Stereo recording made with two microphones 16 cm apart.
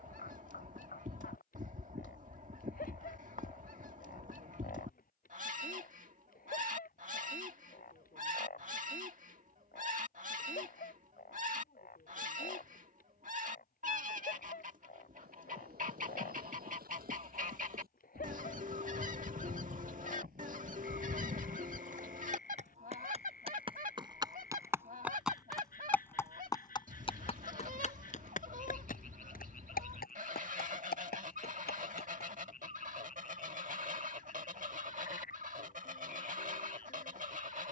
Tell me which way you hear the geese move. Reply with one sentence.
You can hear the geese stay put.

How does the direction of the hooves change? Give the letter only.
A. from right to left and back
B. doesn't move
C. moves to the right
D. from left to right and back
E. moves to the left
E.